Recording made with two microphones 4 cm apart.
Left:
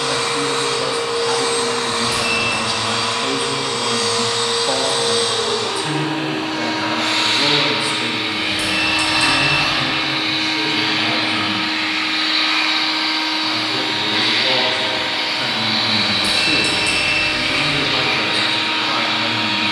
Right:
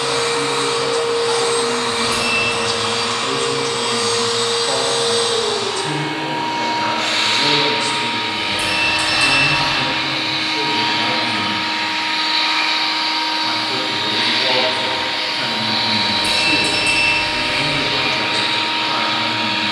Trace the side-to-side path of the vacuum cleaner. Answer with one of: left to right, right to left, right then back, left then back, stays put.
right to left.